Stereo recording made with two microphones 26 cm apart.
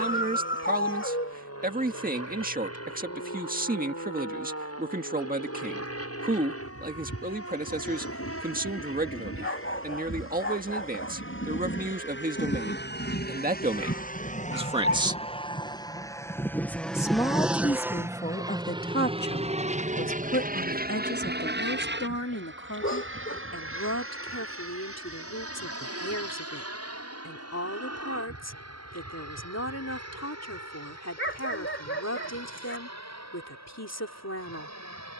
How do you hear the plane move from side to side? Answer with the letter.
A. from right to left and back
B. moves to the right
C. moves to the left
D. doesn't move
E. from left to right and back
B.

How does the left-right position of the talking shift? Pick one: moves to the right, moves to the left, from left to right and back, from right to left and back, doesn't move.
moves to the left.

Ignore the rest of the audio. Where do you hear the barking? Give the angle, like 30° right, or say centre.
50° left.